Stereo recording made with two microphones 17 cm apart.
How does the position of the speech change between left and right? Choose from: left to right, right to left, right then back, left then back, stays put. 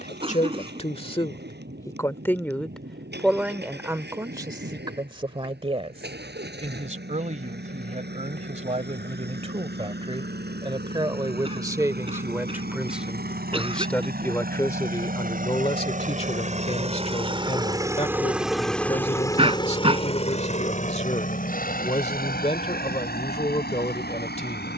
right then back.